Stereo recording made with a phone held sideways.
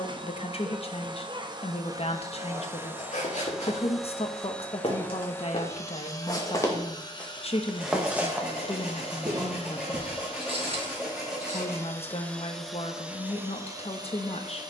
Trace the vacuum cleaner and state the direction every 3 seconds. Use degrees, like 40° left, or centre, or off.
30° right, 10° left, 30° left, 40° left, 10° right.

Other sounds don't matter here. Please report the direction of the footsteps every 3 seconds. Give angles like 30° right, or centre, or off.
60° left, 50° left, 10° left, 50° right, off.